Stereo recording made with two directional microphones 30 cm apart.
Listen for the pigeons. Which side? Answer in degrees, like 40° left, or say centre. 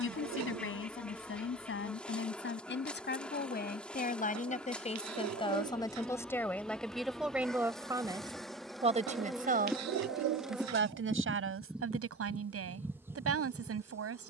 60° right.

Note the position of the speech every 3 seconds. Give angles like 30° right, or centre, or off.
40° left, 20° left, centre, 40° right, 50° right.